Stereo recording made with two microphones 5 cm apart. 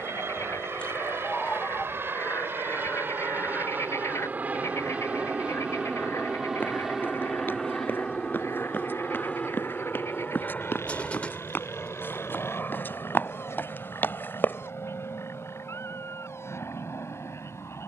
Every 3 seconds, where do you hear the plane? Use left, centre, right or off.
right, right, centre, left, left, left.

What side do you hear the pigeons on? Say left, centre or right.
left.